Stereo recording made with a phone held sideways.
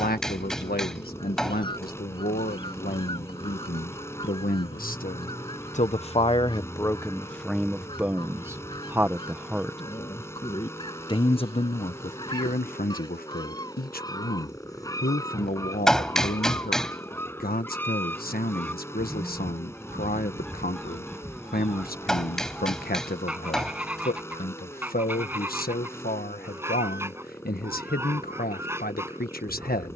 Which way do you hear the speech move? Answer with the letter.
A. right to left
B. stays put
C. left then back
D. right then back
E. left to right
D.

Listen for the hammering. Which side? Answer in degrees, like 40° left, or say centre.
centre.